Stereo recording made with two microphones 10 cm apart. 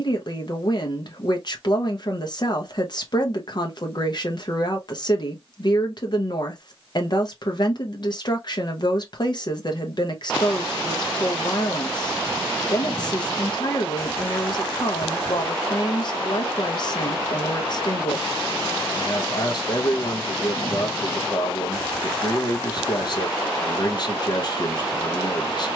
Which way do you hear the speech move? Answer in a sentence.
You can hear the speech stay put.